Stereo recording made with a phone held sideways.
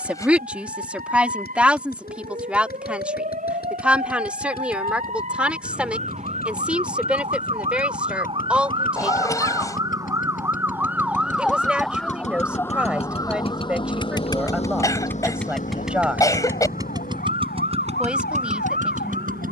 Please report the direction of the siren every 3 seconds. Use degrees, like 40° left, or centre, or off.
60° right, 50° right, 40° right, 10° right, 30° left, 60° left, 70° left.